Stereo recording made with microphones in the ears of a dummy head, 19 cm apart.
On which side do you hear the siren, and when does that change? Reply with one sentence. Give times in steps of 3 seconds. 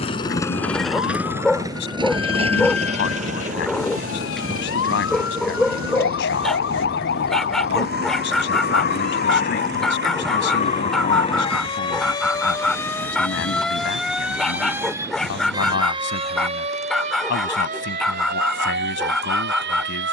You can hear the siren on the left from 0 s, in the centre from 12 s and on the right from 15 s.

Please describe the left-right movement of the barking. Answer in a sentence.
In this clip you hear the barking stay put.